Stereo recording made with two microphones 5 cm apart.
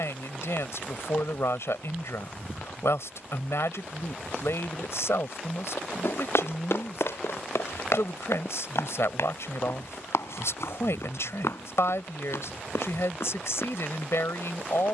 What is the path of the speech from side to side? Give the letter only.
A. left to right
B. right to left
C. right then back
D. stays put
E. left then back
D.